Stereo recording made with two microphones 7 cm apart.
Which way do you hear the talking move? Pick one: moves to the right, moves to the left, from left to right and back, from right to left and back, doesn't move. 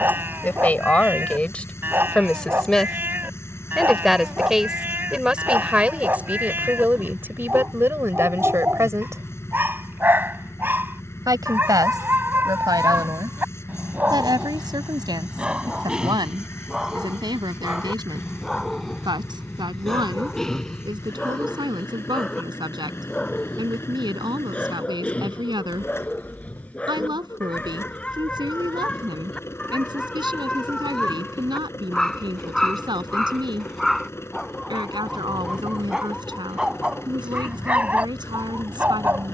moves to the right.